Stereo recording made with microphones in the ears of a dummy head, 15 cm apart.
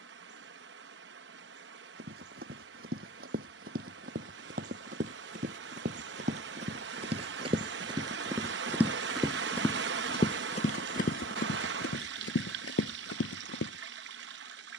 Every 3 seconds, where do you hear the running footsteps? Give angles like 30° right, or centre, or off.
60° right, 50° right, 30° right, 40° left, 80° left.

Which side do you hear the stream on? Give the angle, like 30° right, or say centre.
80° right.